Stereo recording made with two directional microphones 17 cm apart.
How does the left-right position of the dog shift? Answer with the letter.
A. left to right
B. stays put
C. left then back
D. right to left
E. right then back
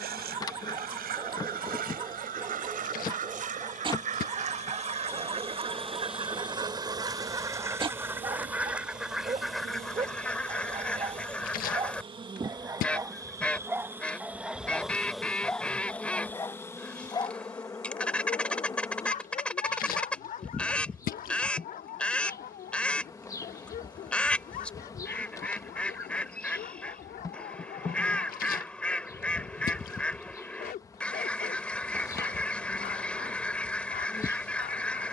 D.